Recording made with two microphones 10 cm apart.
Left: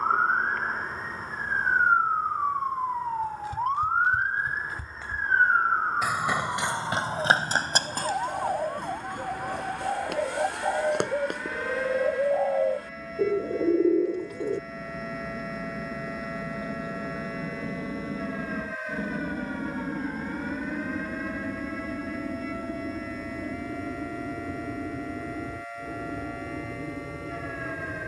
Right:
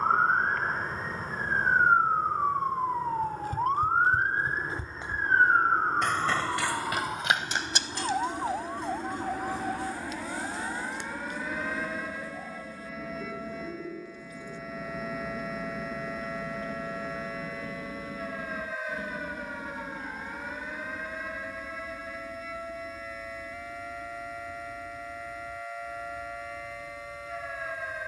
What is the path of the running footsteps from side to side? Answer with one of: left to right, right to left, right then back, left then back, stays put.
right to left.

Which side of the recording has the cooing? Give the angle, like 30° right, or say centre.
80° left.